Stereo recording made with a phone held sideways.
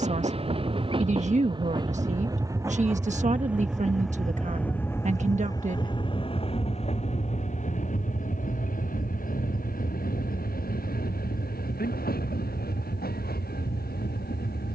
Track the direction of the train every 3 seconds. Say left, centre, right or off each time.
right, centre, left, left, left.